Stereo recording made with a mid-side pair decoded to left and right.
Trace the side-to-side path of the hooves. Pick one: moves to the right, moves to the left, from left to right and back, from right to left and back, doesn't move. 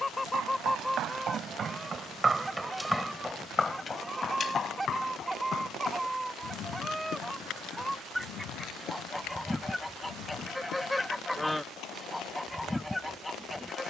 moves to the left.